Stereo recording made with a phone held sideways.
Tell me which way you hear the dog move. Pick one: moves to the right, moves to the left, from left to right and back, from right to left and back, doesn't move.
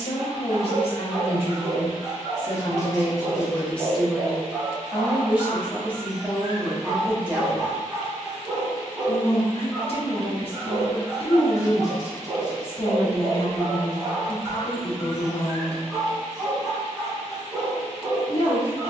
doesn't move.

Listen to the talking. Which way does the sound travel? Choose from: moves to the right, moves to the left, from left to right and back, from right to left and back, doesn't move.
from left to right and back.